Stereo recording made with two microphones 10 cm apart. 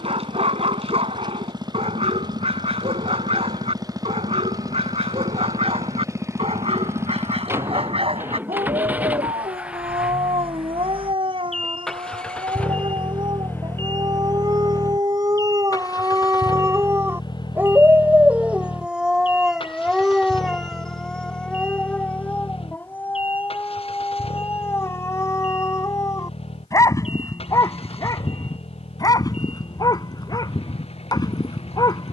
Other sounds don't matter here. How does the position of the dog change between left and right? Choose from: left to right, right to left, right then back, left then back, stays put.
right to left.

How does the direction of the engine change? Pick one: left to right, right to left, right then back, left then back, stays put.
right to left.